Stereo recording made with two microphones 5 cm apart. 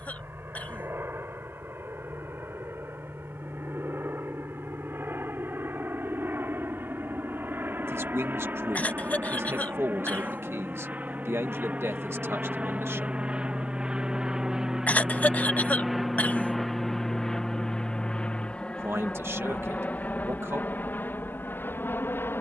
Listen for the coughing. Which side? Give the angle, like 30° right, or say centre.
30° left.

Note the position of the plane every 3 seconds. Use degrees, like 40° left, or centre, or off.
60° right, 60° right, 50° right, 40° right, 20° right, centre, 30° left, 40° left.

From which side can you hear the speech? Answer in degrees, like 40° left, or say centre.
70° right.